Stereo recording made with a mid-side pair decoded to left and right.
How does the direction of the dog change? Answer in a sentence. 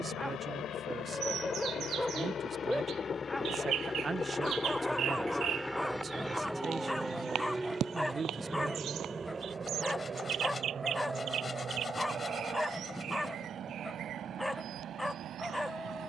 In this clip you hear the dog stay put.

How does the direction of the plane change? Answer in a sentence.
You can hear the plane move from left to right.